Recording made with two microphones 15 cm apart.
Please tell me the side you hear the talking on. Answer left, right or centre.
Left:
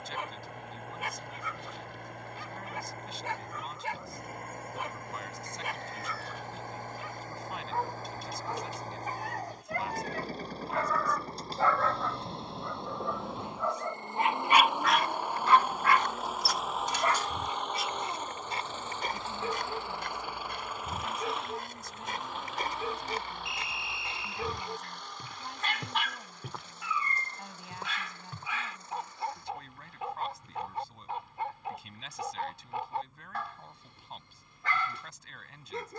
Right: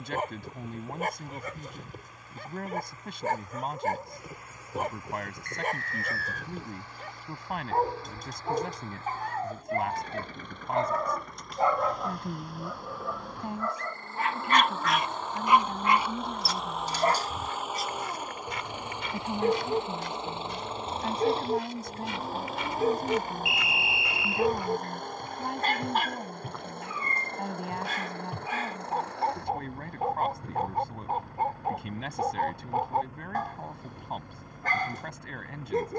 right.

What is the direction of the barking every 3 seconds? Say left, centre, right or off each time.
right, right, right, right, centre, right, right, right, right, right, right, right.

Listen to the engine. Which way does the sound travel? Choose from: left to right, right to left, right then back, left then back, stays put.
left to right.